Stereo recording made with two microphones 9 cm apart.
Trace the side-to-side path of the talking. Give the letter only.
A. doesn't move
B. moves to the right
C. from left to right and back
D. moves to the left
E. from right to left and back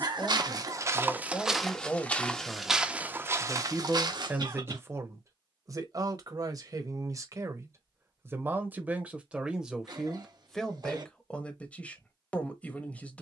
C.